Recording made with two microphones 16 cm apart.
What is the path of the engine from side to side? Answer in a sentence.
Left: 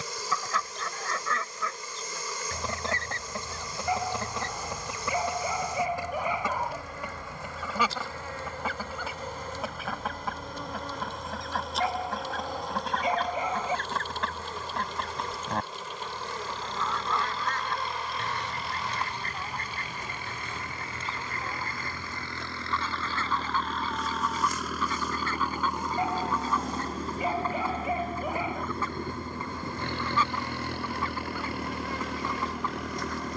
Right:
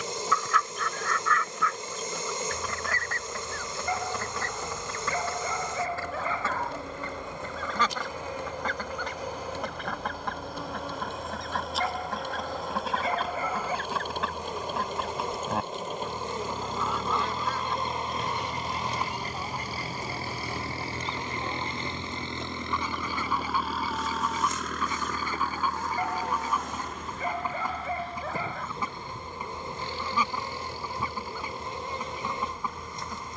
In this clip you hear the engine travel towards the left.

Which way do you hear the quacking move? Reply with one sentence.
In this clip you hear the quacking move from left to right.